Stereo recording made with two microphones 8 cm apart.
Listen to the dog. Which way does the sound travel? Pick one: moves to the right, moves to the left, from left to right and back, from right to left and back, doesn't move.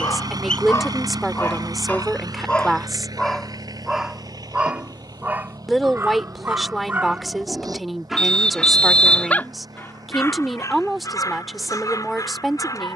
from left to right and back.